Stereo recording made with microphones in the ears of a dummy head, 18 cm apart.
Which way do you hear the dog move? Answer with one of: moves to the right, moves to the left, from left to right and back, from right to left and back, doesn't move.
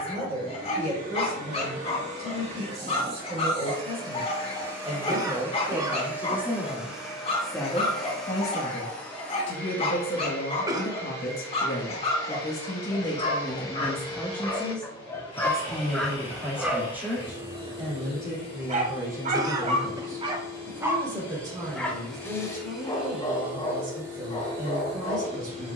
from left to right and back.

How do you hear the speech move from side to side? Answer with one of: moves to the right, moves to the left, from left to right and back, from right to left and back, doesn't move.
from right to left and back.